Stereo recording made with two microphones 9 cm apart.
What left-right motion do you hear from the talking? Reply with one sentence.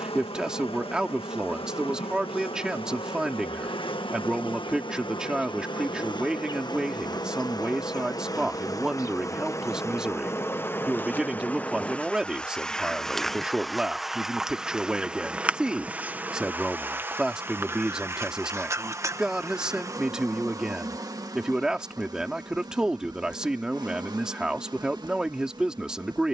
In this clip you hear the talking stay put.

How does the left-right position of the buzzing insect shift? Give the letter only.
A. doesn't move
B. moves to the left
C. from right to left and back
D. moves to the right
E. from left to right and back
D.